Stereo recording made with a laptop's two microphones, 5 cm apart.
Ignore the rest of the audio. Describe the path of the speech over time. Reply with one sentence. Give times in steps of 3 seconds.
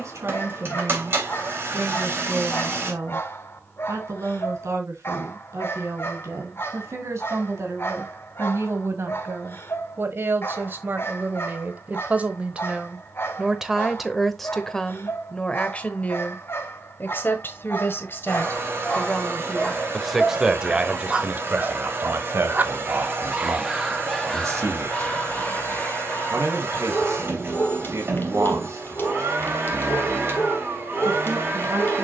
In this clip you hear the speech on the right from 0 s, in the centre from 12 s, on the left from 15 s, in the centre from 18 s and on the right from 21 s.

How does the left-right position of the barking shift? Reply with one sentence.
You can hear the barking go right and come back.